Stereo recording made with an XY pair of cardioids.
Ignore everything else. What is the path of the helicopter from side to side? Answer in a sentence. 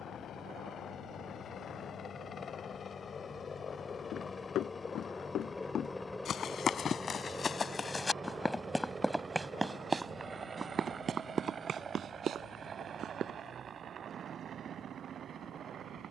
In this clip you hear the helicopter move to the right.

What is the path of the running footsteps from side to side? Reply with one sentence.
In this clip you hear the running footsteps move to the right.